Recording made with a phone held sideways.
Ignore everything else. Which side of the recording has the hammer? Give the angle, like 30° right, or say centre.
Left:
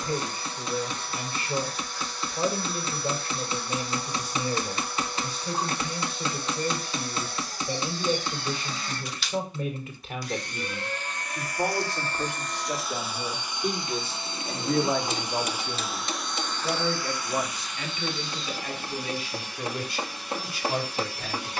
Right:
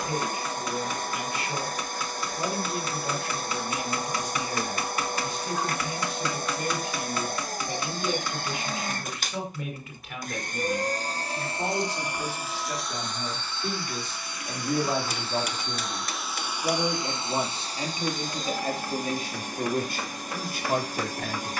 30° left.